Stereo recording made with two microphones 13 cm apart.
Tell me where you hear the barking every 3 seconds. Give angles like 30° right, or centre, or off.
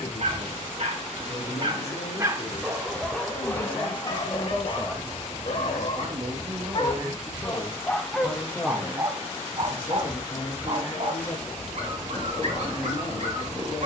40° right, 30° left, 10° left, 50° right, 60° right.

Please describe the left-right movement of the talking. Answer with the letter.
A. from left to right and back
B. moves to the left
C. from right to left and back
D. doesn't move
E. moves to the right
A.